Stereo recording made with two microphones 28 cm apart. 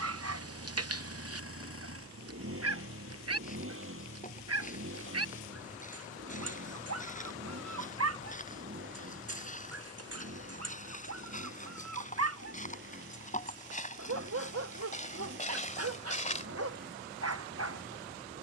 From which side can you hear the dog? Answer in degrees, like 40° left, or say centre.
60° right.